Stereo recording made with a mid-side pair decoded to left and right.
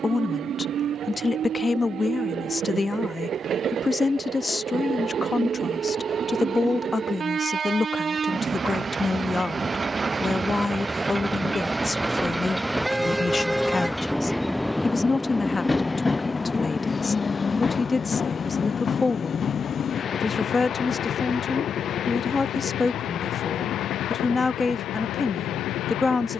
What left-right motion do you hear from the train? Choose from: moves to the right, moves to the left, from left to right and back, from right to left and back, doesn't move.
moves to the left.